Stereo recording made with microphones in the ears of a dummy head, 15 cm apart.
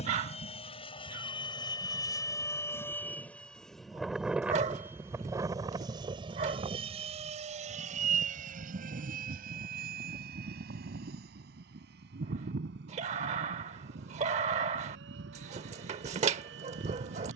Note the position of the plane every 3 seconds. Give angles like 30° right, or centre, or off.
30° left, 10° right, 40° right, 60° right, 70° right, 70° right.